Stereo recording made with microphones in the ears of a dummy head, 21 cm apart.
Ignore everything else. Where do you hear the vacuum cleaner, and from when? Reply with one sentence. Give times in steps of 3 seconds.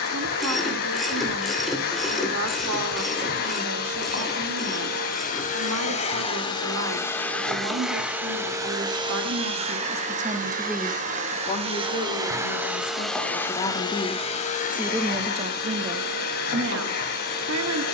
You can hear the vacuum cleaner on the left from 0 s, in the centre from 6 s, on the right from 9 s, in the centre from 12 s and on the left from 15 s.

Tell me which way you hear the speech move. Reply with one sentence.
You can hear the speech move from right to left and back again.